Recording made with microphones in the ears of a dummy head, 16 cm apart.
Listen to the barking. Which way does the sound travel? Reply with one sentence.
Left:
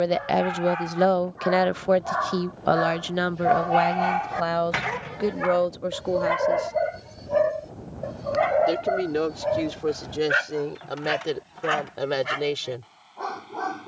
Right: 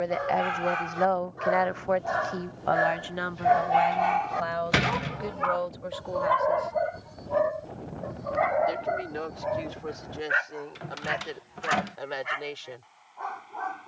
In this clip you hear the barking go from the right side to the left.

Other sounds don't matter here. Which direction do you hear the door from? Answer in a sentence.
You can hear the door on the right.